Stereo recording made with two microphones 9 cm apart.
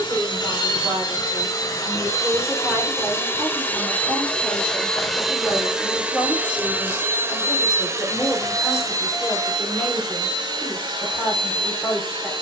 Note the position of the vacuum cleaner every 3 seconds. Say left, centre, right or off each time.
left, centre, right, right.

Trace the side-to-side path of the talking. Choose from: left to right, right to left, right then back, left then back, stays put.
right to left.